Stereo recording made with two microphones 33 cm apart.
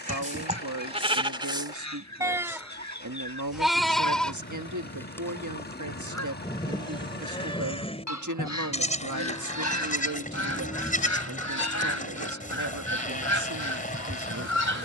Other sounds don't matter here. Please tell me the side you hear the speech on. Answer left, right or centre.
right.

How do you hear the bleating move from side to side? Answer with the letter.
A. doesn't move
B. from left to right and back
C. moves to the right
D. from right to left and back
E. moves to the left
E.